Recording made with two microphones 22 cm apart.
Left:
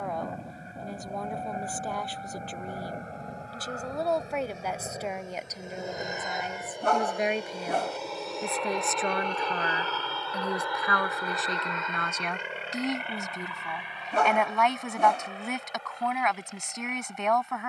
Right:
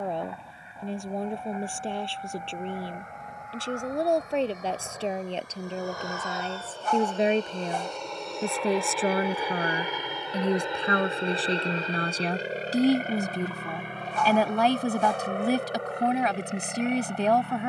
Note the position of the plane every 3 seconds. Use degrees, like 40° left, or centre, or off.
40° left, 30° left, 10° left, 20° right, 40° right, 60° right.